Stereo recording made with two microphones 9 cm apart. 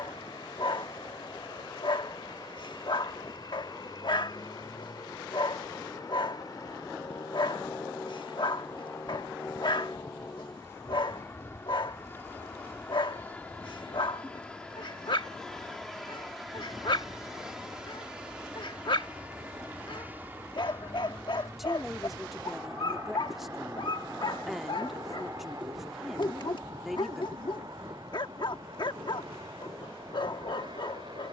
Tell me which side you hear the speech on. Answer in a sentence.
In this clip you hear the speech in the centre.